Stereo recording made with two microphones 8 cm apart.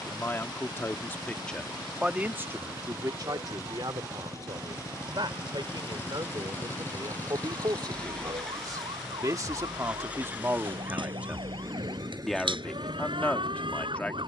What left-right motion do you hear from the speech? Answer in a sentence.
You can hear the speech go right and come back.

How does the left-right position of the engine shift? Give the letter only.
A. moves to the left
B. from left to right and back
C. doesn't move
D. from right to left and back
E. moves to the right
E.